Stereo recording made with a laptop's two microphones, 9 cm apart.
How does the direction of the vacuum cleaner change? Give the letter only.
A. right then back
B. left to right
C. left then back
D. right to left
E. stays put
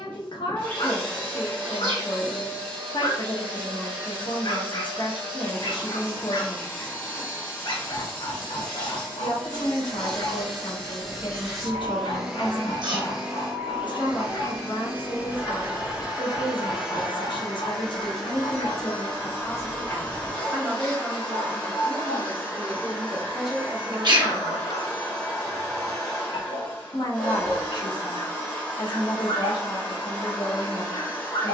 A.